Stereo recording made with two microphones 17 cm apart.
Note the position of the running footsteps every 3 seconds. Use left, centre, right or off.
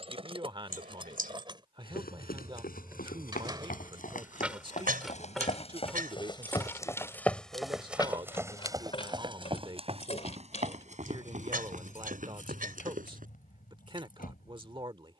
left, left, centre, right, right.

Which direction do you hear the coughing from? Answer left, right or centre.
right.